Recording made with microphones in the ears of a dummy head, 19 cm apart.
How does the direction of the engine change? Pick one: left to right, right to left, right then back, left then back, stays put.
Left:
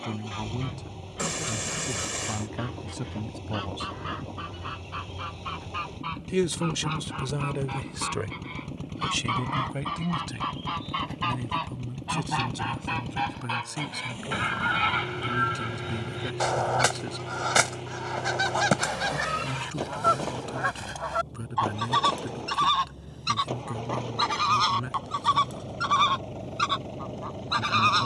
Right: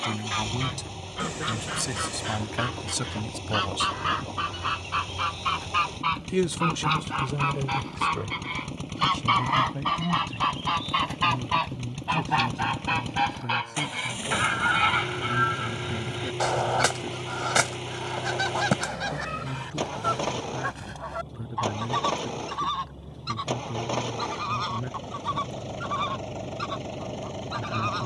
stays put.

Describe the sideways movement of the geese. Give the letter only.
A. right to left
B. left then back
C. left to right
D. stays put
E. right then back
A.